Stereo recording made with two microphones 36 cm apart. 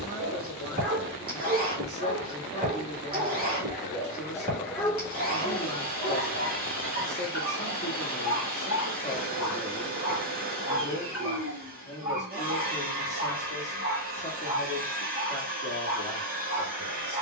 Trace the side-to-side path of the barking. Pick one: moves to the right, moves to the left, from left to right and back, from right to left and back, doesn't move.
moves to the left.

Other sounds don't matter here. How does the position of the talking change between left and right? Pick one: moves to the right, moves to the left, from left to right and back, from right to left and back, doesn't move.
doesn't move.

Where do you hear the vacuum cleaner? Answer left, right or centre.
right.